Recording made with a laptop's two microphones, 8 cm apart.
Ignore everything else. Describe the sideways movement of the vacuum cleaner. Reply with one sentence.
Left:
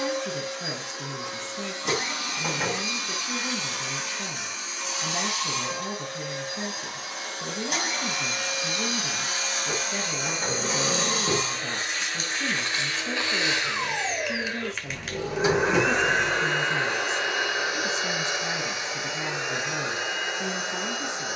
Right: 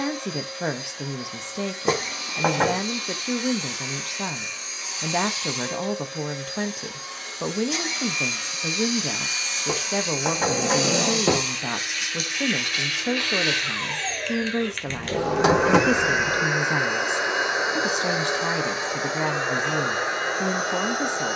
You can hear the vacuum cleaner travel towards the right.